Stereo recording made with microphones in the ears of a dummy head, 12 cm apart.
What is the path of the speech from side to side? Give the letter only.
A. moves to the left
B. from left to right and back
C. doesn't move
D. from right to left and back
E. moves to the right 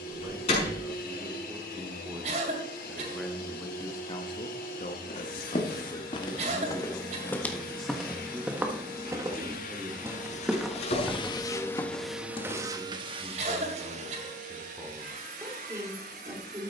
D.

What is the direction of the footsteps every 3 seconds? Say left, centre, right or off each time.
off, left, centre, centre, left, off.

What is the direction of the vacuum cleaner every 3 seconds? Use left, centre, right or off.
left, left, left, left, right, right.